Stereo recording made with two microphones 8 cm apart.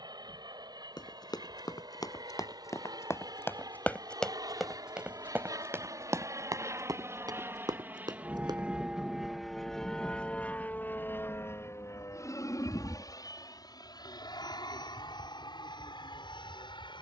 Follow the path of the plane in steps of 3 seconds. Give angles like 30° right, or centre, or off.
70° right, 60° right, 30° right, 20° left, 50° left, 60° left.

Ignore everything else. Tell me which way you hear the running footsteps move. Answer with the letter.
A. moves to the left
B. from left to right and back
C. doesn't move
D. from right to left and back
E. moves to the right
E.